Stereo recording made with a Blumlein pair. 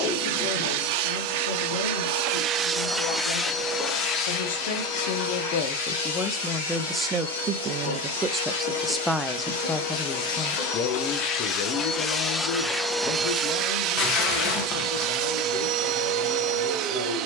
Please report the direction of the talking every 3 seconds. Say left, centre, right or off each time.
left, left, centre, left, left, left.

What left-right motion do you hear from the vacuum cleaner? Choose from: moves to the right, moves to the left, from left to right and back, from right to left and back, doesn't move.
from right to left and back.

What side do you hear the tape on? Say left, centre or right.
left.